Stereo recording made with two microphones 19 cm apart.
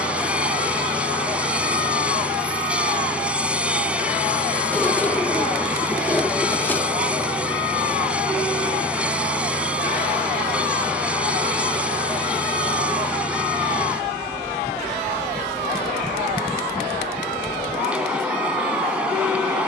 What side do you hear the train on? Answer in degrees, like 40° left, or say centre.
10° right.